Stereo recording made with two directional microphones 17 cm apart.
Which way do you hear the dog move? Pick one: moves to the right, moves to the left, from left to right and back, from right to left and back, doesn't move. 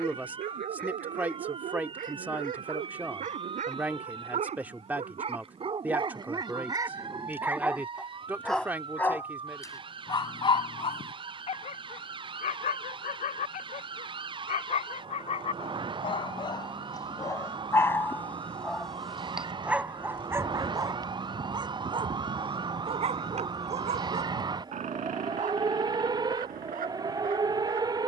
from right to left and back.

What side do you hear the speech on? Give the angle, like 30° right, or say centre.
10° right.